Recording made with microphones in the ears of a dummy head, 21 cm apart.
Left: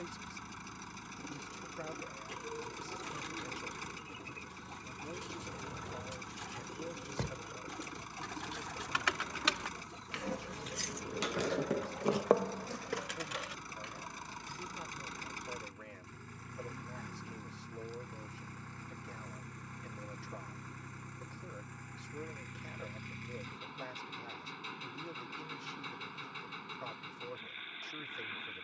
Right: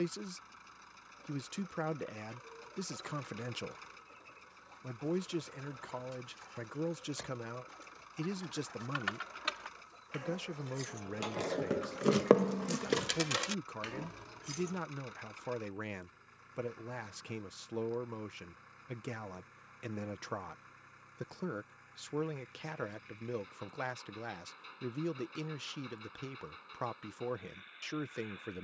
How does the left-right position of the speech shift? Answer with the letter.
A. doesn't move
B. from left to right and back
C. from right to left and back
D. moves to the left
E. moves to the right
A.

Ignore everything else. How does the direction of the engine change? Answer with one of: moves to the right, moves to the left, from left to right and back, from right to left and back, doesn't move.
doesn't move.